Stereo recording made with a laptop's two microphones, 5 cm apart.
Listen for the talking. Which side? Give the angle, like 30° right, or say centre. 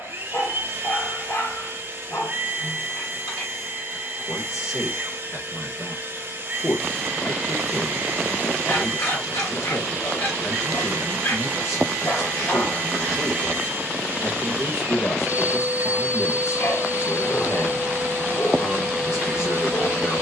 60° left.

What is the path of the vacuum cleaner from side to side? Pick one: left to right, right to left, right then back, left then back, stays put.
stays put.